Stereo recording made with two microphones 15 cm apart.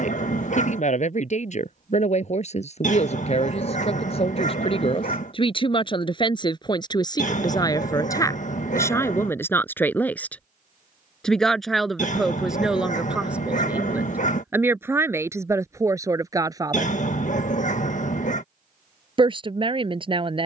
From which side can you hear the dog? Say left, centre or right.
left.